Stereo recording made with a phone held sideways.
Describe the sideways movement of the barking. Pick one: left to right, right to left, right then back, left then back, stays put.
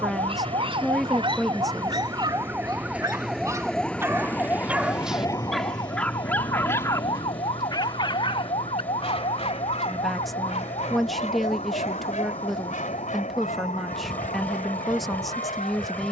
right to left.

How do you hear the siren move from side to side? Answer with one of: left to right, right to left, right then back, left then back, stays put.
right to left.